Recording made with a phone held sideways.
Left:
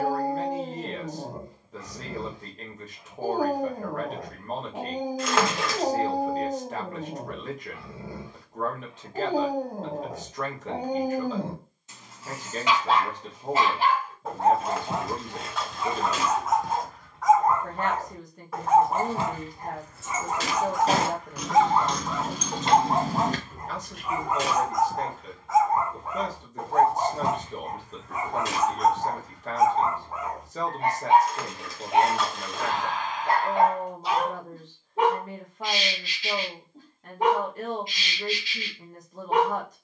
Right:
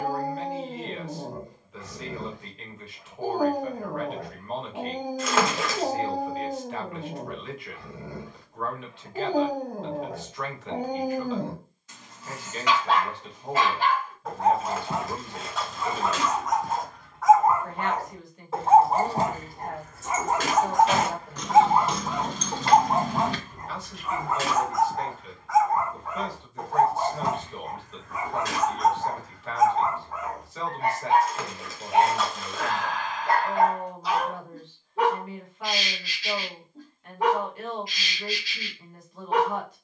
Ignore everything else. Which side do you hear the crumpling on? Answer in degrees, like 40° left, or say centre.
centre.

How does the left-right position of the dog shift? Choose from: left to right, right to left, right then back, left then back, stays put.
right then back.